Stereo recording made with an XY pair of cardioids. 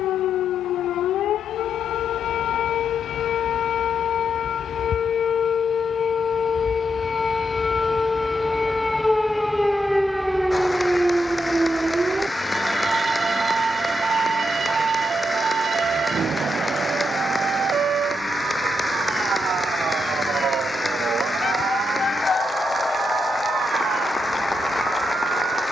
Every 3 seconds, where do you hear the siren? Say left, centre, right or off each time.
left, left, left, centre, right, right, right, right, right.